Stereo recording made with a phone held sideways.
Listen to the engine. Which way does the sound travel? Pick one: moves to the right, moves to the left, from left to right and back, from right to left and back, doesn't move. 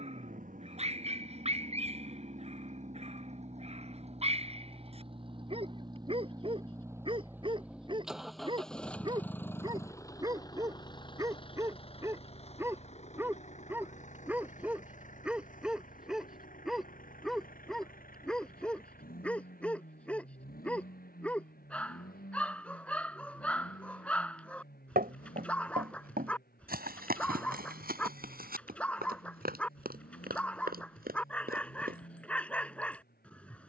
moves to the left.